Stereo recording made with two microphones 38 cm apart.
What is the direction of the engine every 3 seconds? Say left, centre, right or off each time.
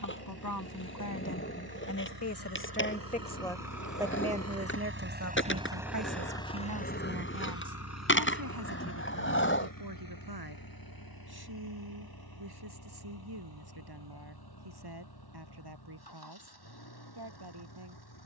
right, right, left, left, left, left.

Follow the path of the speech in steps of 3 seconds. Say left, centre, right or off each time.
left, right, right, right, right, right.